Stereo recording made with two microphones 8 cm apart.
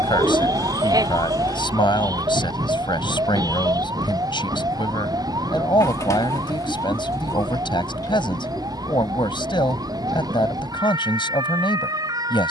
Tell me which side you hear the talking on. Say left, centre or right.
left.